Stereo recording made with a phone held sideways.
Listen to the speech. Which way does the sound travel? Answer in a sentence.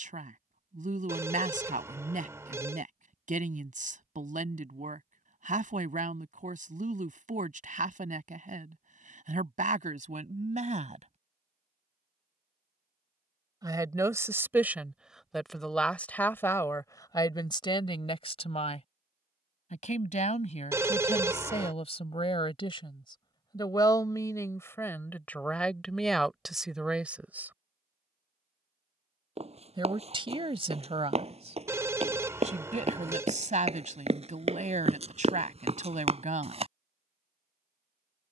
In this clip you hear the speech move from right to left and back again.